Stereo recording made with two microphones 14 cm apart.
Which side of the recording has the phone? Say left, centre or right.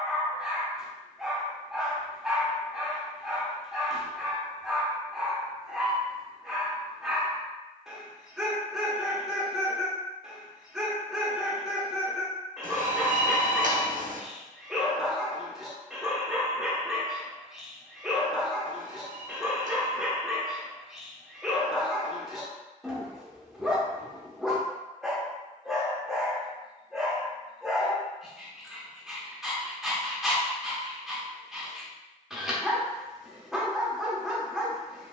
right.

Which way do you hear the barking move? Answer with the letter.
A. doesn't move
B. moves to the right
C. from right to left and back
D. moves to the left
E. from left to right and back
A.